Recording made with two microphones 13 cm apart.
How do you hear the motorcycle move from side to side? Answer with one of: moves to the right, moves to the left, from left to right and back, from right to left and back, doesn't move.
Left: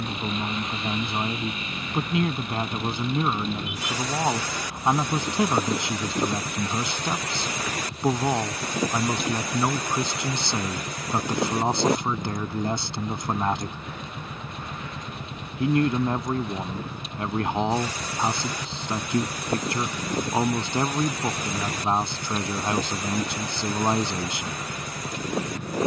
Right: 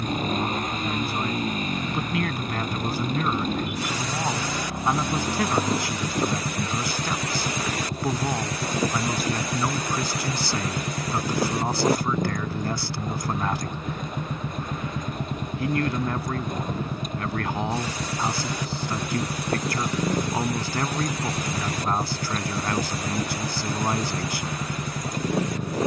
doesn't move.